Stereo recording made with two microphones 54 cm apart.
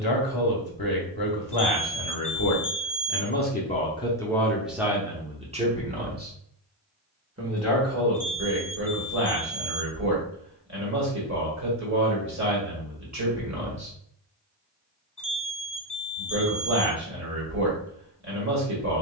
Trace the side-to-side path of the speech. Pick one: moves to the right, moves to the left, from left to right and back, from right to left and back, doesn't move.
moves to the right.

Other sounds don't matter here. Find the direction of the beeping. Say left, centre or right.
left.